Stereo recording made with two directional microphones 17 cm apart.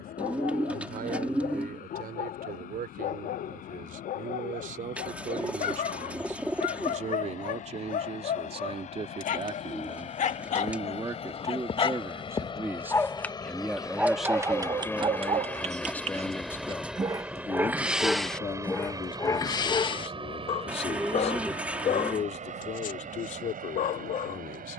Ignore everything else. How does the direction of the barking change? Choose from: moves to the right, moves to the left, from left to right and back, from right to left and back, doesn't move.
from left to right and back.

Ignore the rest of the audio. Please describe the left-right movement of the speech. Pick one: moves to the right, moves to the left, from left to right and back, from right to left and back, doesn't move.
moves to the left.